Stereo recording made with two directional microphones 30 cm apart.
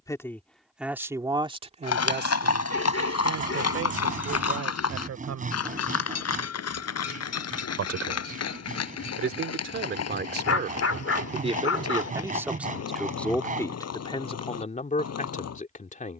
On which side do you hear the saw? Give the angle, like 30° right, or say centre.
30° right.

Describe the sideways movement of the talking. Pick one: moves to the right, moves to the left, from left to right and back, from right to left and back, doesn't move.
from left to right and back.